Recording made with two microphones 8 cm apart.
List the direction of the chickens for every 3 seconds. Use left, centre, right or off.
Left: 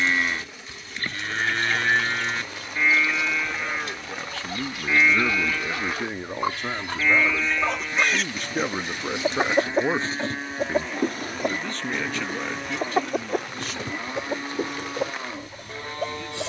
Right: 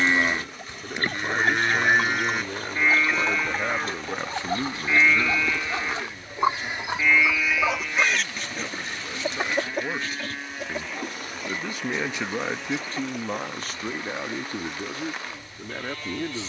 right, right, centre, left, left, left.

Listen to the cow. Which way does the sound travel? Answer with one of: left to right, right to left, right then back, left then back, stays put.
right to left.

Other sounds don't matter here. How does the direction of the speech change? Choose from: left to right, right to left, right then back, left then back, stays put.
left then back.